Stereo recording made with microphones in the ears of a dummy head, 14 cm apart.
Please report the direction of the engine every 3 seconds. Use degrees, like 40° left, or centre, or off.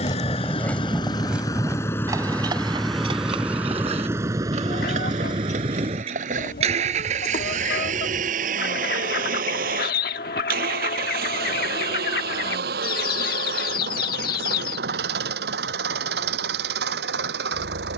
20° left, 20° right, 50° right, 60° right, 60° right, 70° right.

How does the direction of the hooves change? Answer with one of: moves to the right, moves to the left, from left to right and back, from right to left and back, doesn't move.
moves to the right.